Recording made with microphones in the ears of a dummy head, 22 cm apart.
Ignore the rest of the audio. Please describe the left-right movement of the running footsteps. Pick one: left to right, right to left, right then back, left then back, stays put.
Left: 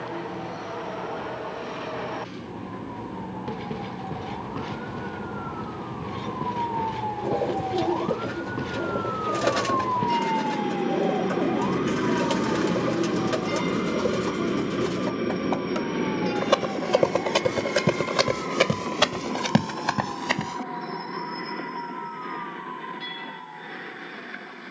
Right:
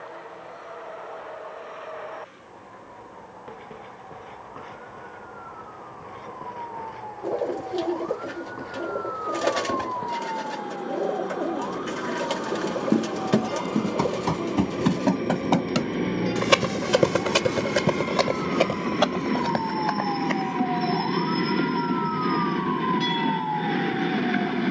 right to left.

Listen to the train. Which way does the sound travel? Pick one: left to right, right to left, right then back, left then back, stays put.
left to right.